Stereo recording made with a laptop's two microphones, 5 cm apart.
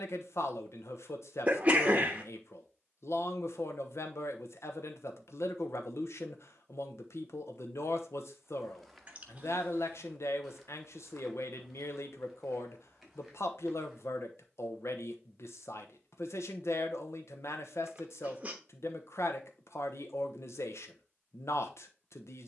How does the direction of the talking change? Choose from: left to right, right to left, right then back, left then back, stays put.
stays put.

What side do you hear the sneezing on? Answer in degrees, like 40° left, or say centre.
30° right.